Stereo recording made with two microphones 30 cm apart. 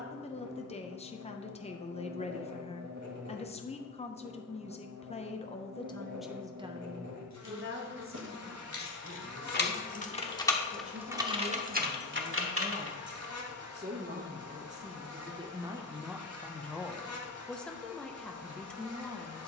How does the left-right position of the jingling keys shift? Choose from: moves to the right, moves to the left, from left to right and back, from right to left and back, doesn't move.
moves to the right.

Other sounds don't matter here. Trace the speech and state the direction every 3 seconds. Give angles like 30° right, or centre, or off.
20° left, 20° left, 30° right, 50° right, 30° right, centre, centre.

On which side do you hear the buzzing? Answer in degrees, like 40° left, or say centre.
60° right.